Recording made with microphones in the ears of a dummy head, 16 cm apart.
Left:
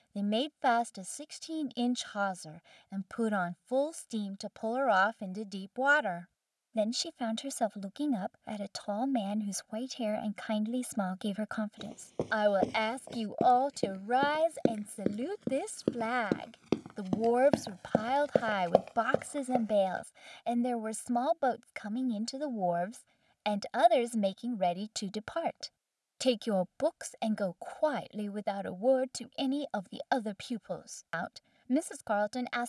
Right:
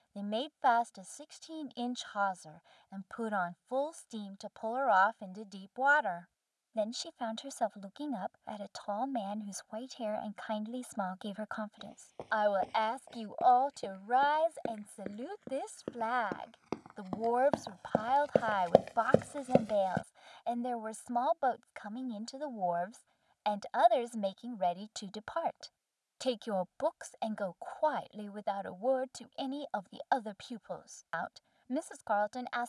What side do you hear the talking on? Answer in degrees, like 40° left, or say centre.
30° left.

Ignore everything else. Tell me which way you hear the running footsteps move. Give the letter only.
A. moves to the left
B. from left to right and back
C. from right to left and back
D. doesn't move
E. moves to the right
E.